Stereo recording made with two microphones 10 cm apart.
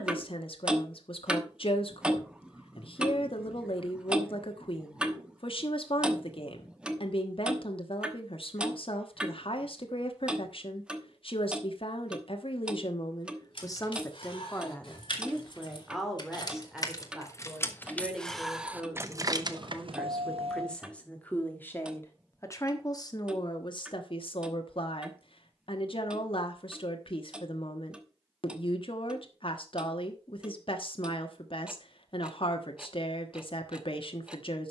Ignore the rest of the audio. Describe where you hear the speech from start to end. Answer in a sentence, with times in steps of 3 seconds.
You can hear the speech on the left from 0 s, in the centre from 15 s and on the left from 21 s.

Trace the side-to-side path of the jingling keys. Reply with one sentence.
In this clip you hear the jingling keys move to the right.